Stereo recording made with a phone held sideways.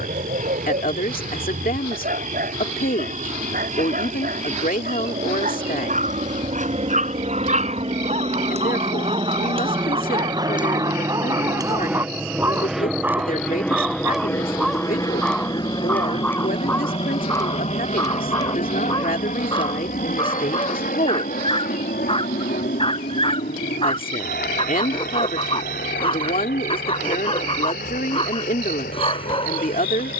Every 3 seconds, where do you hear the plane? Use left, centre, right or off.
right, right, right, right, centre, left, left, left, left, left.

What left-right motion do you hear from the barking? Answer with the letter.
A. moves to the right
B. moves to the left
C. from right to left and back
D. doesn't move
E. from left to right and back
B.